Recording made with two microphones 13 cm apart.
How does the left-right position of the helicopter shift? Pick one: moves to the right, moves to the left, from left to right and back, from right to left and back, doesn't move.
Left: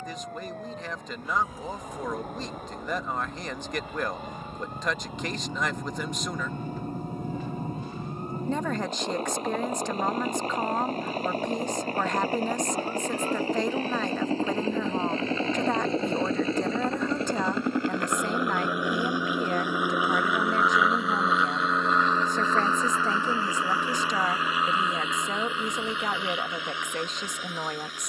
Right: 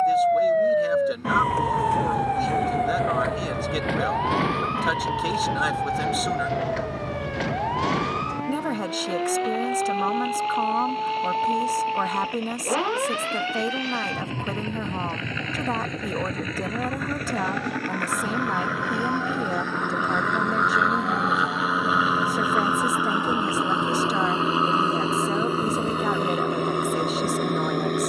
moves to the right.